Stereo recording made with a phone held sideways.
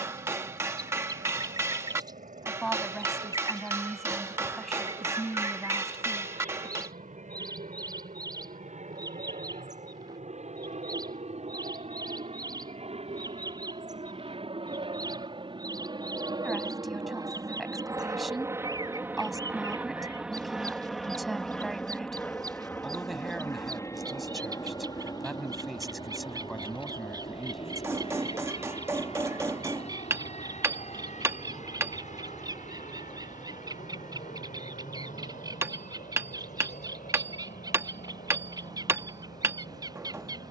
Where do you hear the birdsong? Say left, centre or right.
right.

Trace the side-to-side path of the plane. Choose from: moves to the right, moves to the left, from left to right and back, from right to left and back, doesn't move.
moves to the left.